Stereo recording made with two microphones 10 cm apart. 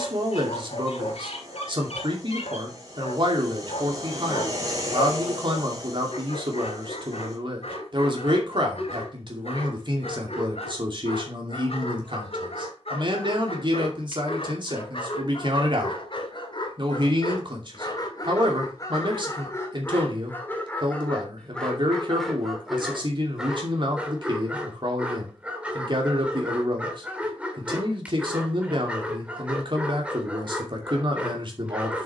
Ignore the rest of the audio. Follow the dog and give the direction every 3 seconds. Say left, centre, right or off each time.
left, left, left, left, left, left, left, centre, centre, centre, centre.